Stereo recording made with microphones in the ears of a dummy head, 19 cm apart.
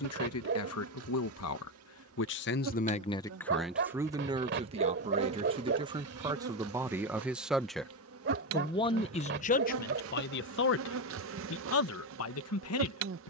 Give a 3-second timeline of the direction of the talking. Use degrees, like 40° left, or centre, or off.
70° left, 20° right, centre, 50° left, 80° left.